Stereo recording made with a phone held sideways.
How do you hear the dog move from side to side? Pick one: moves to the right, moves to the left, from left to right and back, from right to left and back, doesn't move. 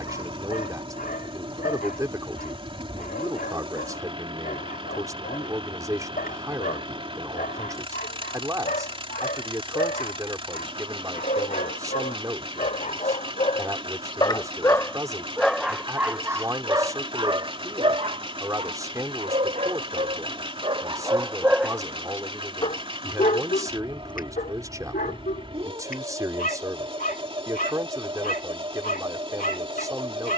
from left to right and back.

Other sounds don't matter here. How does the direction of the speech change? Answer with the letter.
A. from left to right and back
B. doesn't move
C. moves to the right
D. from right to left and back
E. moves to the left
B.